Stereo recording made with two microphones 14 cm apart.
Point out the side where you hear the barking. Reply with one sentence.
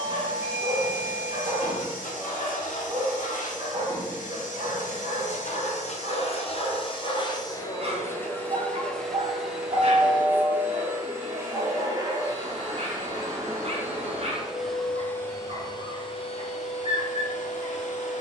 In this clip you hear the barking on the right.